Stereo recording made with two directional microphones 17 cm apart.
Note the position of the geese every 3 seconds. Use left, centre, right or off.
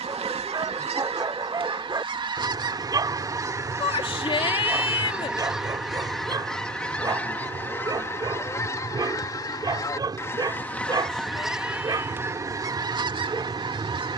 right, centre, centre, centre, right.